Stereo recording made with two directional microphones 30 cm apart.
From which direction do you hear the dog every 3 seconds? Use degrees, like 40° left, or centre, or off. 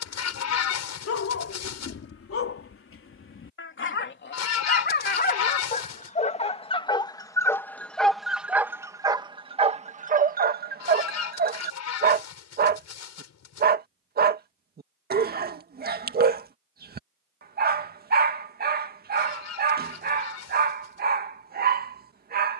50° left, 40° left, 10° left, 30° right, 30° right, 30° right, 30° right, 30° right.